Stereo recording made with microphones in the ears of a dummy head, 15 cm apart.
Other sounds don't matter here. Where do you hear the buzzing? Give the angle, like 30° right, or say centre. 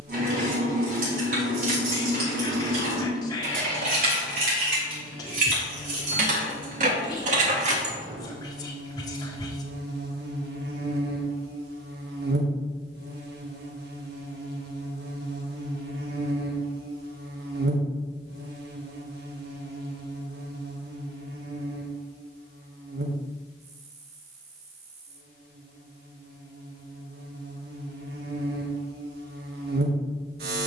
70° right.